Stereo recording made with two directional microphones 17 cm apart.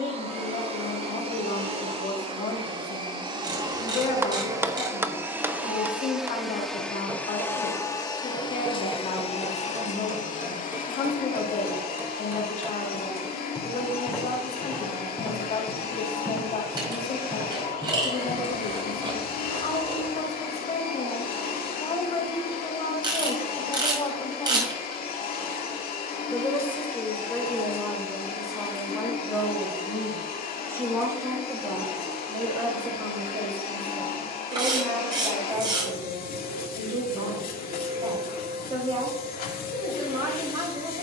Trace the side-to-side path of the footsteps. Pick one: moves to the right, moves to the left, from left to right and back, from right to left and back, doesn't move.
moves to the right.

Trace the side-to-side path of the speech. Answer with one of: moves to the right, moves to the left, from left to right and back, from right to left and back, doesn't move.
moves to the right.